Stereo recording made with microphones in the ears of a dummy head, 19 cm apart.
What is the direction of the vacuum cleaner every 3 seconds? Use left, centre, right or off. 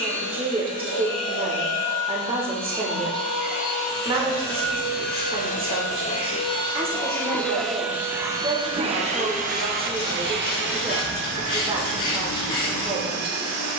left, left, centre, right, right.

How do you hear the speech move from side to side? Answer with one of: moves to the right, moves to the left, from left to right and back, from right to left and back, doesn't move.
doesn't move.